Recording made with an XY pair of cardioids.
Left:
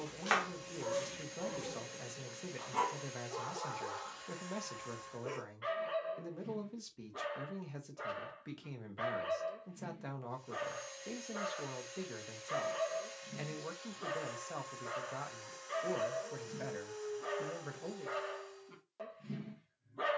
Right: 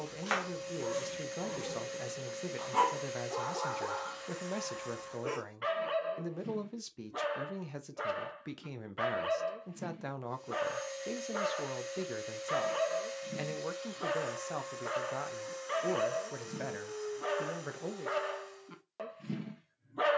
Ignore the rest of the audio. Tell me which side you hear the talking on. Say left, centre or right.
right.